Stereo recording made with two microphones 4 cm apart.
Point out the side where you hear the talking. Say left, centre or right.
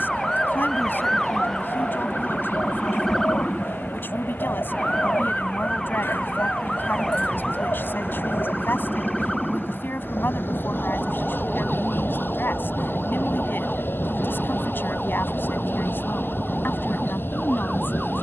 left.